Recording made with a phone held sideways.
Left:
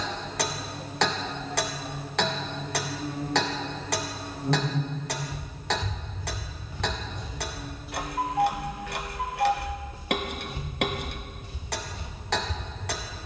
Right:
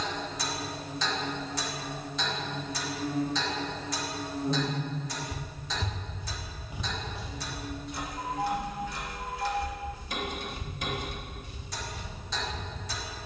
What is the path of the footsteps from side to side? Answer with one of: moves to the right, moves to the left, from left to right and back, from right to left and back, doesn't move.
moves to the left.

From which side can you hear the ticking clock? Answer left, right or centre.
left.